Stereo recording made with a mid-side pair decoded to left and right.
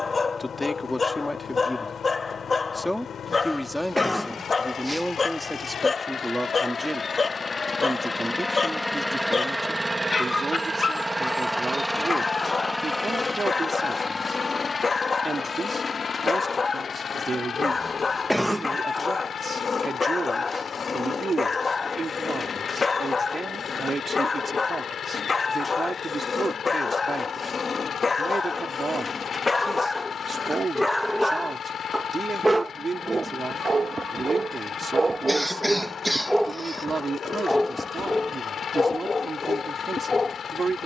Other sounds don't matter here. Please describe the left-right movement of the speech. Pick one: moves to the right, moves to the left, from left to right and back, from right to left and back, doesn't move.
moves to the right.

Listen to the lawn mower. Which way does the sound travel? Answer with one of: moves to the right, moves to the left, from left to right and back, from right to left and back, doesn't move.
from left to right and back.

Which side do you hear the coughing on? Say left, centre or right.
centre.